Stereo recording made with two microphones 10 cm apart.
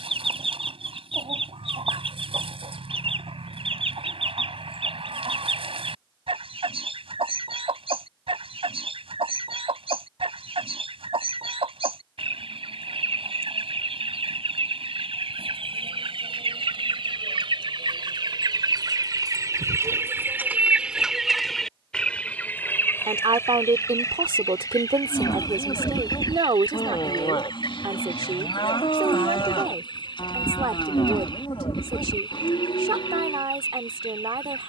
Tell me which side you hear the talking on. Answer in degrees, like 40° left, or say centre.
60° right.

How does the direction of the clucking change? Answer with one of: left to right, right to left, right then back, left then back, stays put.
right to left.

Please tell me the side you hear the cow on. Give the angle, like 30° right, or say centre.
60° left.